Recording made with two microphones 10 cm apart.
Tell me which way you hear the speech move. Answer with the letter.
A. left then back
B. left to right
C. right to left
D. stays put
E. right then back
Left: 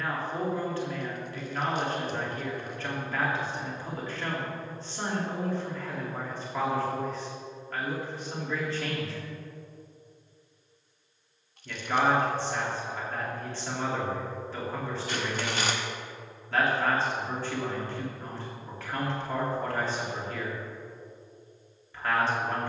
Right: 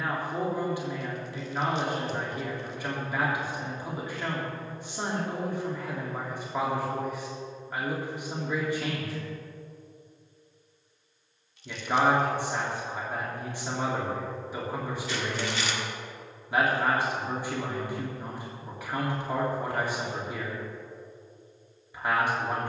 D.